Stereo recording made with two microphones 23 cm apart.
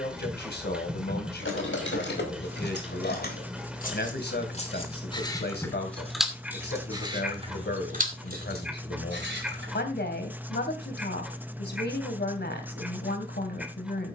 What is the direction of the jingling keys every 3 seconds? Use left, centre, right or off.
left, left, right, right, off.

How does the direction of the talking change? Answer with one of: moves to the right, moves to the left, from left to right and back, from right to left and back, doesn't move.
doesn't move.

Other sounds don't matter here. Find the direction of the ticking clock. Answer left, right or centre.
centre.